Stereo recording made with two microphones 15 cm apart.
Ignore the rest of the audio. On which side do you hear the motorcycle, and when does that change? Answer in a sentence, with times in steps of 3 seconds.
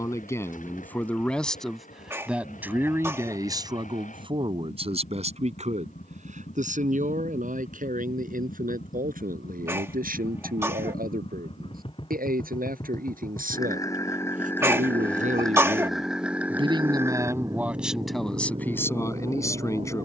In this clip you hear the motorcycle on the left from 0 s, in the centre from 15 s and on the right from 18 s.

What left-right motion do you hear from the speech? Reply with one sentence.
In this clip you hear the speech go right and come back.